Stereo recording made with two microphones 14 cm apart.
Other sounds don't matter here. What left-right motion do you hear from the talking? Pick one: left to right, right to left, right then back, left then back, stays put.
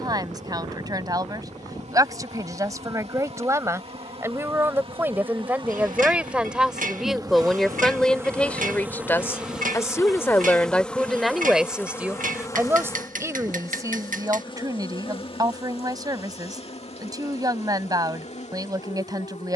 left then back.